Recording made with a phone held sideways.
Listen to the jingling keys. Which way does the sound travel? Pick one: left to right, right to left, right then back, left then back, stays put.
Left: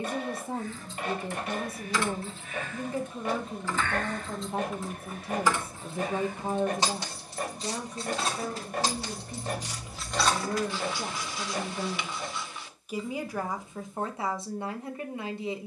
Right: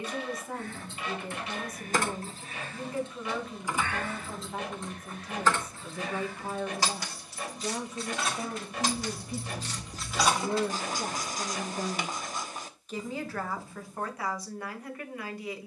left then back.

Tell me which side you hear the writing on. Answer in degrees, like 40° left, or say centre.
40° right.